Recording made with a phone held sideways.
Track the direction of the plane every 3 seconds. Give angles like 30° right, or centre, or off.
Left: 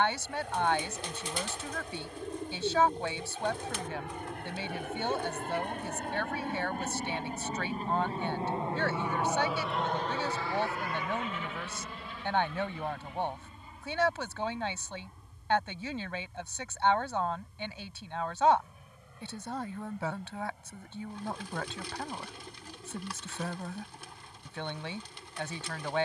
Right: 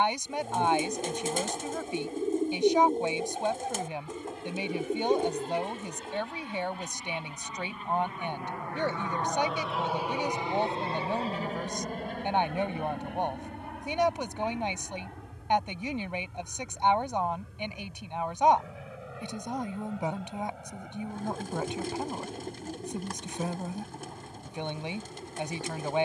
80° left, 70° left, 40° left, 20° right, 60° right, 70° right, 70° right, 80° right, 80° right.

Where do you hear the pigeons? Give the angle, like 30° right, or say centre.
40° right.